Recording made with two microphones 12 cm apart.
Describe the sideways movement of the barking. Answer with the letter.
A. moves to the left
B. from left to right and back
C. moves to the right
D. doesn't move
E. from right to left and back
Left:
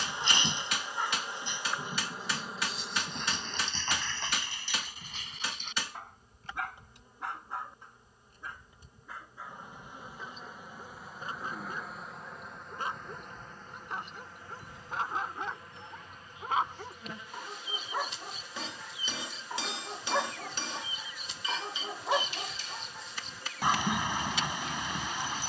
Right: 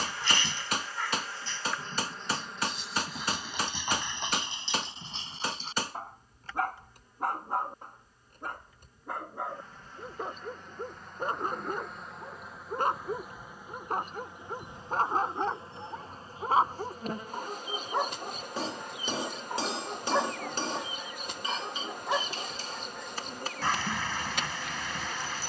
B.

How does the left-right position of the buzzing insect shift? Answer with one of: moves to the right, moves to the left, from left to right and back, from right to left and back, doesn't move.
moves to the right.